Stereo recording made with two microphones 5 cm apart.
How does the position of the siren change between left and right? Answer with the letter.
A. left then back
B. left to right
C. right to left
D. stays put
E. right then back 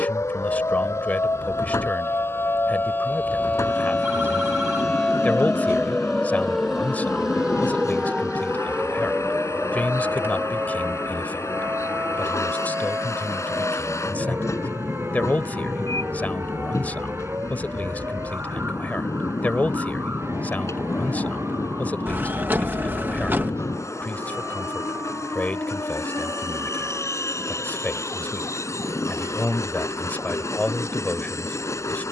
B.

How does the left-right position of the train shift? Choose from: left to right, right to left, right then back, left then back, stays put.
stays put.